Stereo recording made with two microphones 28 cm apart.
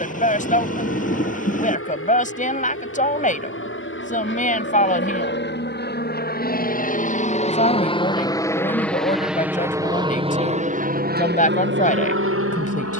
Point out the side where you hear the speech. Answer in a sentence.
You can hear the speech on the left.